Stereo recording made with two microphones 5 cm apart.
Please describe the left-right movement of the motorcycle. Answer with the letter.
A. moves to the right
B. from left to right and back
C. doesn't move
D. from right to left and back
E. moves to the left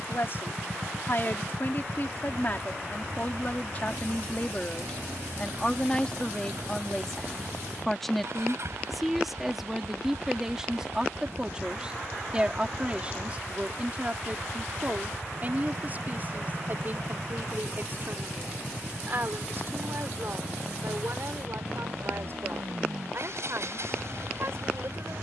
C.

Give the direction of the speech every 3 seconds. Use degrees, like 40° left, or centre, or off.
40° left, 30° left, 10° left, 10° right, 30° right, 40° right, 50° right, 50° right, 50° right.